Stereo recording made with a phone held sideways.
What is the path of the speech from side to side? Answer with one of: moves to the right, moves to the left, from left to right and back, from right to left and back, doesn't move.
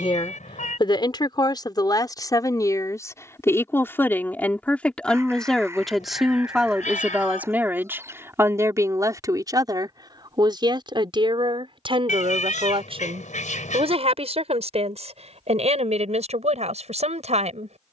moves to the right.